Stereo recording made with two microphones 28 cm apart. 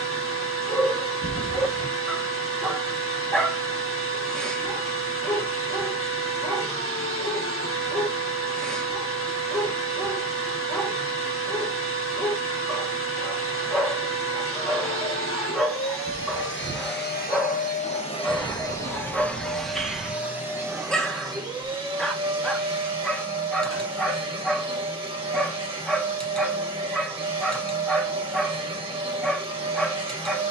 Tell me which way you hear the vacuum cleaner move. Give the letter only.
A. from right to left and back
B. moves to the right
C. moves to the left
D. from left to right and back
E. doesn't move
B.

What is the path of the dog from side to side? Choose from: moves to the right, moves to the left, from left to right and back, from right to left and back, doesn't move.
doesn't move.